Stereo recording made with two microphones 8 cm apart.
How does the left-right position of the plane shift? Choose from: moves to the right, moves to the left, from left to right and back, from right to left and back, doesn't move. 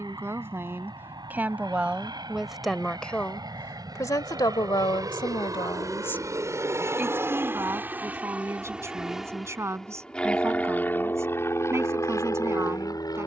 moves to the left.